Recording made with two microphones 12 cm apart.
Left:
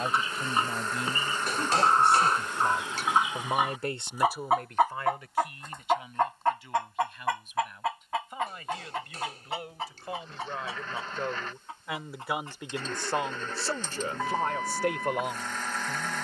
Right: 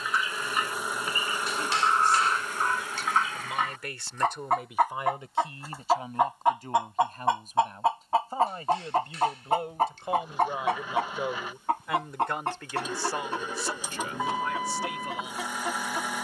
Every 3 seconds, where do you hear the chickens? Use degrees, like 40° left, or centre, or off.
30° left, 10° left, 30° right, 50° right, 70° right, 80° right.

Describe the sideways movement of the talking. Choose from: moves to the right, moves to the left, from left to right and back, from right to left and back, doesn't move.
from left to right and back.